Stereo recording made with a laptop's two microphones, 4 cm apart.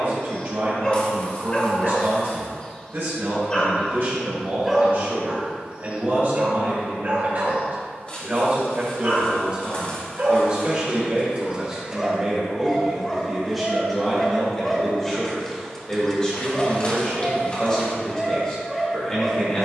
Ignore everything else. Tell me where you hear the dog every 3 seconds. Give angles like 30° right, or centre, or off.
20° left, centre, 50° right, 40° right, 10° left, 10° left, 10° left.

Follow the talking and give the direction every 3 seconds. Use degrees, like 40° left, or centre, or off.
60° right, 60° right, 40° right, 30° right, centre, 10° left, 20° left.